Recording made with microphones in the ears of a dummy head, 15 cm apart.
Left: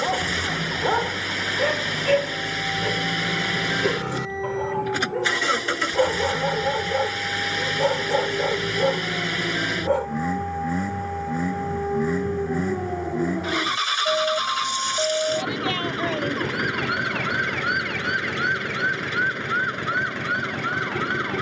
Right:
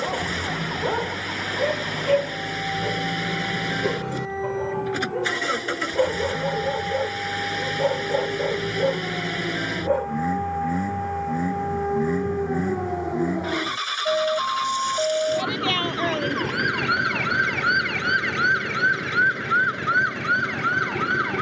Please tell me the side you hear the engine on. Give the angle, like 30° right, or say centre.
30° left.